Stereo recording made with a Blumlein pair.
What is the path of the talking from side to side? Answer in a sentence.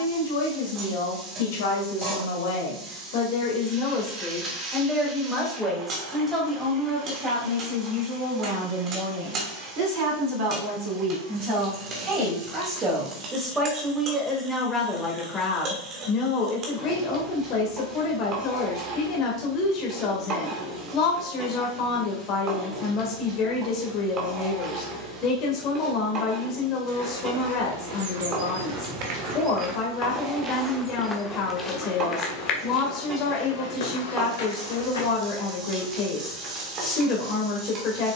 In this clip you hear the talking move from left to right and back again.